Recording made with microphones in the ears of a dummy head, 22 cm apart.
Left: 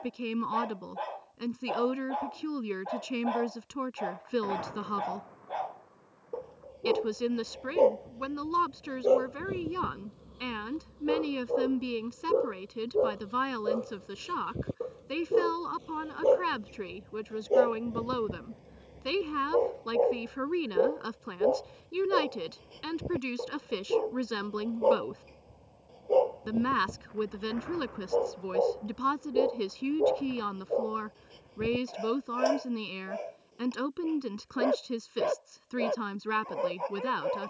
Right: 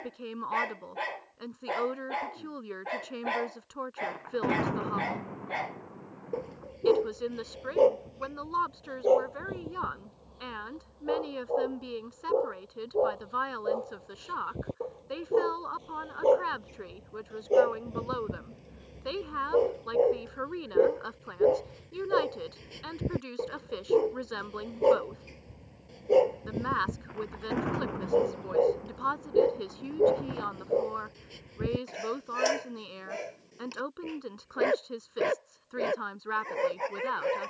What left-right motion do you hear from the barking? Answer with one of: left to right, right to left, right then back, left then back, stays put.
left then back.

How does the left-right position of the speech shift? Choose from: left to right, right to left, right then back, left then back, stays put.
stays put.